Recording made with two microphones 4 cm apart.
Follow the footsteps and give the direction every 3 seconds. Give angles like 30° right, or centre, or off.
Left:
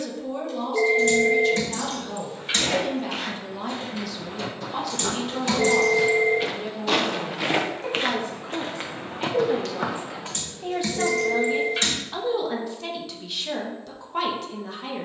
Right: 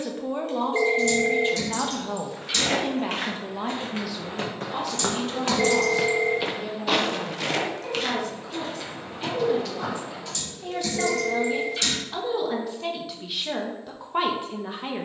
60° right, 50° right, 20° left, 70° left, off.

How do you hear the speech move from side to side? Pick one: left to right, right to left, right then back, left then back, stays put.
left then back.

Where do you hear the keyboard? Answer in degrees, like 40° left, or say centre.
50° left.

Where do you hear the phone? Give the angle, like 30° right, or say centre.
50° right.